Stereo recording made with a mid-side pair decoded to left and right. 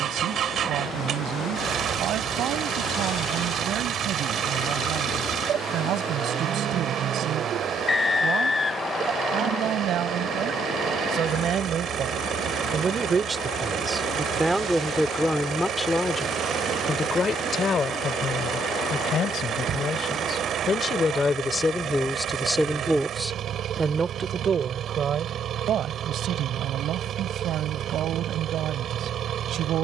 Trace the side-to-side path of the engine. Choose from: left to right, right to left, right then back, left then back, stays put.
stays put.